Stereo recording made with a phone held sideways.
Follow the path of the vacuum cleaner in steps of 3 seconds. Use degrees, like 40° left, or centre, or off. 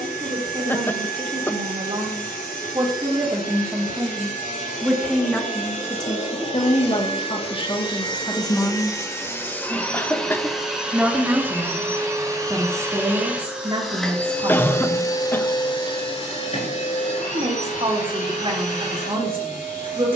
70° left, 60° left, 40° left, centre, 10° right, 40° left, 60° left.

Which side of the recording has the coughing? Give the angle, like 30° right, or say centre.
10° left.